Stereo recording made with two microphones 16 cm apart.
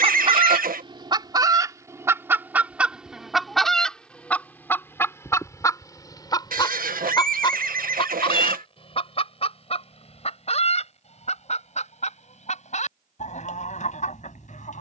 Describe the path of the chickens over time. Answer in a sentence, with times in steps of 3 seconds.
You can hear the chickens on the right from 0 s, in the centre from 3 s and on the left from 6 s.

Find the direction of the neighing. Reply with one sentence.
In this clip you hear the neighing on the right.